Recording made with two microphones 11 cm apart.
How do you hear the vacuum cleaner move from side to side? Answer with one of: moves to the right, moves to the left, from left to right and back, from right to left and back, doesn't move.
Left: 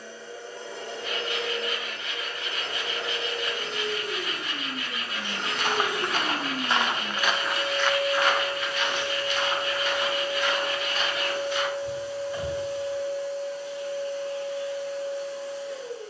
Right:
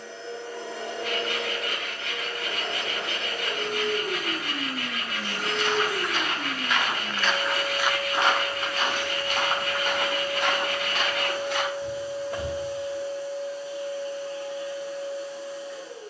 moves to the left.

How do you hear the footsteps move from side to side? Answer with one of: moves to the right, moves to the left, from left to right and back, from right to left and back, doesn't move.
moves to the right.